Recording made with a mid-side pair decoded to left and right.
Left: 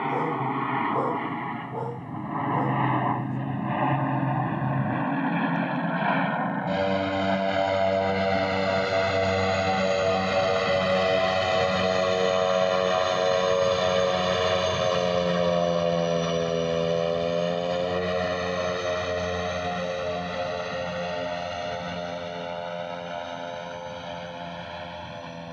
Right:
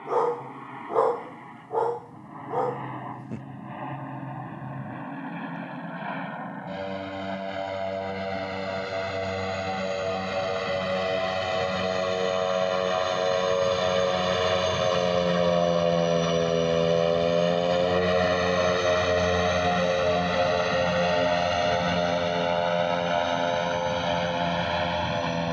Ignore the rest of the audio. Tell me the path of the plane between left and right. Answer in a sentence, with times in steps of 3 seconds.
You can hear the plane on the left from 0 s, in the centre from 12 s and on the right from 18 s.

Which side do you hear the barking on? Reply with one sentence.
You can hear the barking on the right.